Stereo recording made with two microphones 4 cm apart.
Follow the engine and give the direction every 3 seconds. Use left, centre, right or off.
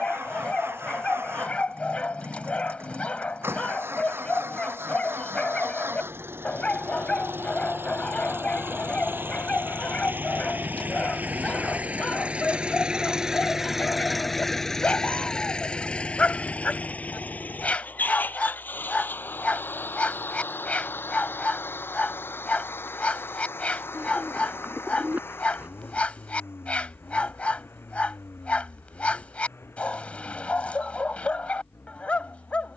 right, right, right, right, centre, left, left, left, left, left, left.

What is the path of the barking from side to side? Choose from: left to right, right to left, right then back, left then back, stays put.
stays put.